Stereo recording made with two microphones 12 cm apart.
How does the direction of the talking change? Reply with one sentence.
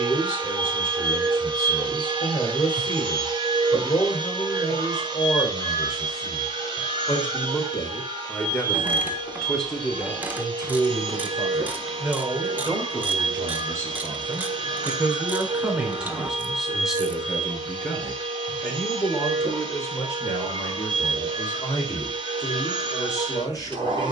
In this clip you hear the talking move from left to right and back again.